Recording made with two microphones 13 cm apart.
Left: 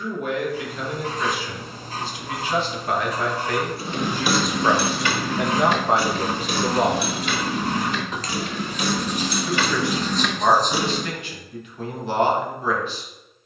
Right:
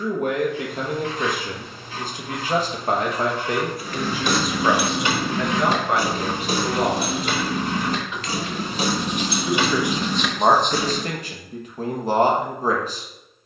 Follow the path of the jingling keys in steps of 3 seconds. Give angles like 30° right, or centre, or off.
off, 10° right, 40° right, 10° right, off.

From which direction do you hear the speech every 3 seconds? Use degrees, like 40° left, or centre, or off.
50° right, centre, 40° left, 30° right, 40° right.